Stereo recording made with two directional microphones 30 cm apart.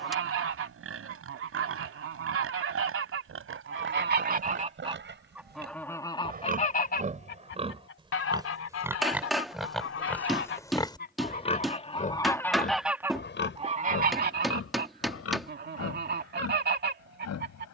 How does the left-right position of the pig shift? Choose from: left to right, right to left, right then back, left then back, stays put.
right to left.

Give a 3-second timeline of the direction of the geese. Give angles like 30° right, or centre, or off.
50° right, 20° right, 40° left, 40° left, 10° right, 30° right.